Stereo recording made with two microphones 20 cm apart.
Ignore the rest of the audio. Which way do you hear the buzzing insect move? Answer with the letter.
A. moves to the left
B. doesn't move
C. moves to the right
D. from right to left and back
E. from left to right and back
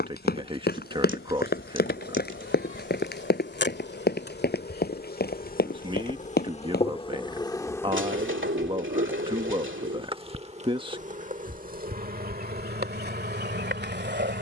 C.